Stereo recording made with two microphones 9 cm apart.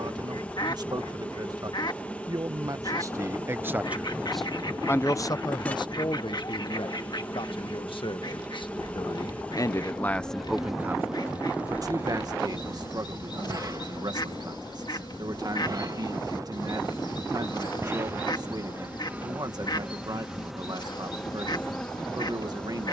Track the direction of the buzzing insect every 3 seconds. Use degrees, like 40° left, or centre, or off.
20° left, 20° left, 20° left, centre, 40° right, 40° right, 10° right, 10° left.